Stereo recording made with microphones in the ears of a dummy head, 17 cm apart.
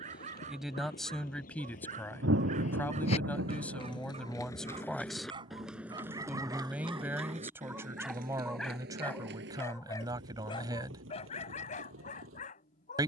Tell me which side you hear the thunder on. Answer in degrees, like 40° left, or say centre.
70° right.